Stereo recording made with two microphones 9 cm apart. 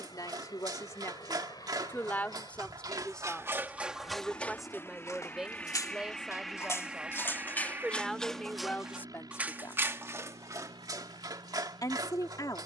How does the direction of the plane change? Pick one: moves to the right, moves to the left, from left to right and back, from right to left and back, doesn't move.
moves to the right.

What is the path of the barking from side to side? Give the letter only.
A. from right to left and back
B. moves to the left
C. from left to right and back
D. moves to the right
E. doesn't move
A.